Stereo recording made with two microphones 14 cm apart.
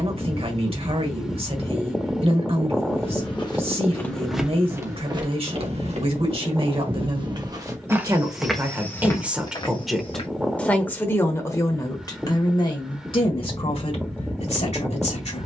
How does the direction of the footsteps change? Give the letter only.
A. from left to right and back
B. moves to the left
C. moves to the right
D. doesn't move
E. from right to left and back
A.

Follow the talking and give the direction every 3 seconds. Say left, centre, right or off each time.
right, right, right, centre, left.